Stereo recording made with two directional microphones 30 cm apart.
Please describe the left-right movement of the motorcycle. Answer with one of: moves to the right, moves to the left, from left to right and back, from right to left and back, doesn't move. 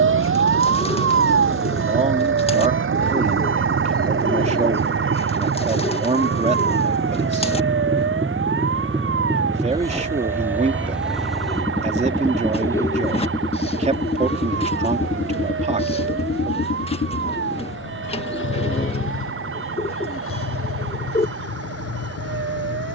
moves to the left.